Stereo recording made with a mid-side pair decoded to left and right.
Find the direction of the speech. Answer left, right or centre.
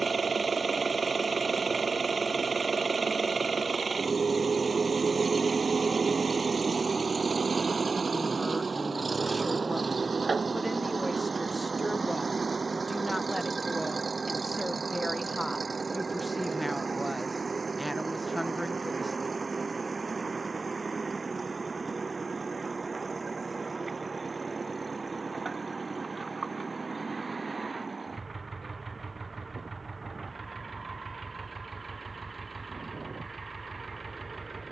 centre.